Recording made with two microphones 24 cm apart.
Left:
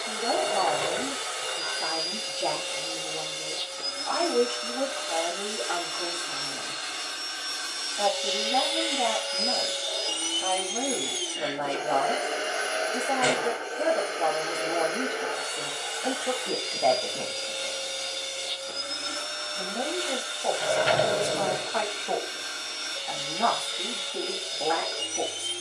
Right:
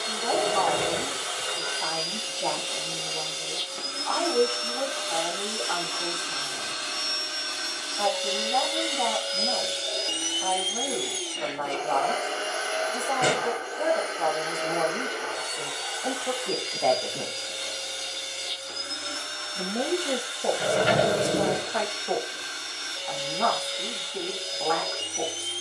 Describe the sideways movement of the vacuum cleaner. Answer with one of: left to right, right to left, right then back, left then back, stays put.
right to left.